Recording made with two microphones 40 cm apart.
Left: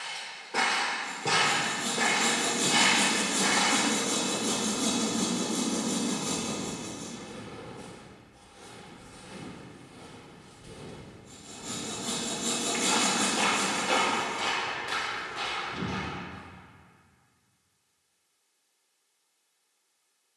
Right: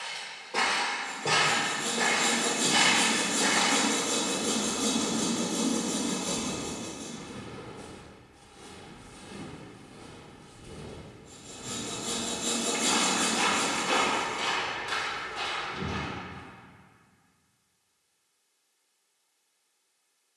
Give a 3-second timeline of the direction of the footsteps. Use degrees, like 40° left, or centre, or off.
20° left, 10° left, 30° right, 60° right, 20° right, 20° left, off.